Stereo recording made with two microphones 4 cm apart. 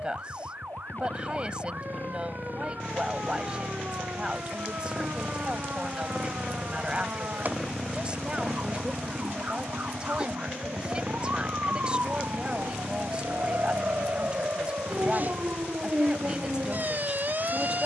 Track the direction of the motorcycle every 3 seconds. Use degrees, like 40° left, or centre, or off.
40° left, 30° left, centre, 30° right, 50° right, 70° right.